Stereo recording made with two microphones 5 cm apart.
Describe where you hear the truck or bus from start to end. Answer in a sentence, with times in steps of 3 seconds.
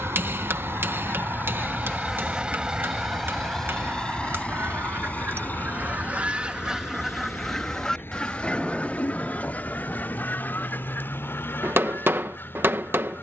You can hear the truck or bus on the right from 0 s and on the left from 3 s.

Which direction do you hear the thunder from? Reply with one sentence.
In this clip you hear the thunder in the centre.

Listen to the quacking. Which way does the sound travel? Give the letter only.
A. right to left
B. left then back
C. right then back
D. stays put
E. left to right
C.